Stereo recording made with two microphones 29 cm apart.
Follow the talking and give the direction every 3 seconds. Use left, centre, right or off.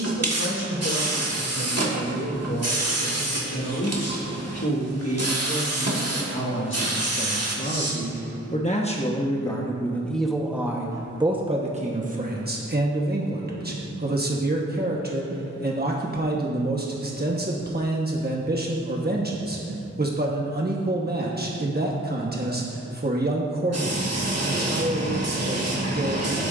left, left, left, centre, right, right, right, right, right.